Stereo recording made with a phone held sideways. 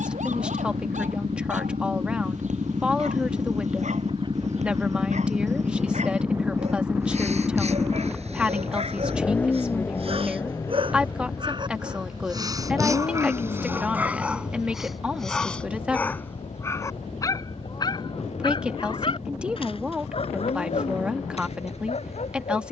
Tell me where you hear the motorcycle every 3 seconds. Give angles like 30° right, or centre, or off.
60° right, 40° right, 10° right, 20° left, 40° left, 50° left, 60° left, 60° left.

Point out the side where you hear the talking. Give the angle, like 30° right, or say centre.
10° right.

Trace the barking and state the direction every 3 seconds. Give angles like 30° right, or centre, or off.
70° right, 70° right, 60° right, 50° right, 20° right, 20° left, 50° left, 60° left.